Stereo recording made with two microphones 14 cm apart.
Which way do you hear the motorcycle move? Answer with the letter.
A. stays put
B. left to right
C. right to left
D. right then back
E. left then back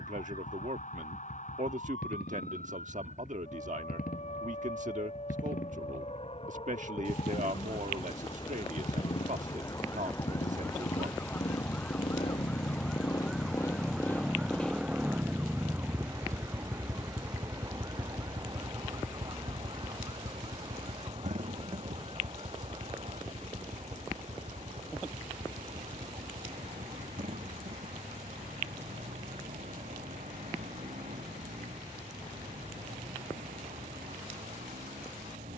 B.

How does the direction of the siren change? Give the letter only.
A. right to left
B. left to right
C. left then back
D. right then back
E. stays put
B.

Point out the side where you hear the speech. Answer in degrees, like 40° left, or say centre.
60° right.